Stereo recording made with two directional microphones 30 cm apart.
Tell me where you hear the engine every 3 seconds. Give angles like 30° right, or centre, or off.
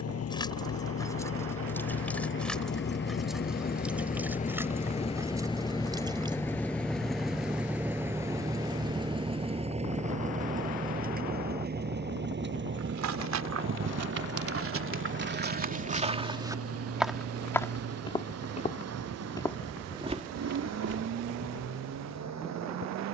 50° left, 20° left, centre, 20° right, 40° right, 50° right, 60° right, 60° right.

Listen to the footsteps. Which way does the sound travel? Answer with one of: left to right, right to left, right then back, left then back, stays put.
left then back.